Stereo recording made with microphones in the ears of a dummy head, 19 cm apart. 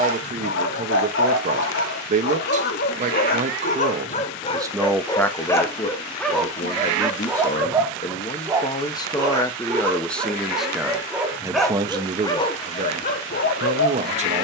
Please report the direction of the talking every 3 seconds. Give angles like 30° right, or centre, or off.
40° right, 10° right, 30° left, centre, 30° right.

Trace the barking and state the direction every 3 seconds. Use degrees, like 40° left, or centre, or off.
60° left, 30° left, 10° right, 10° right, 40° left.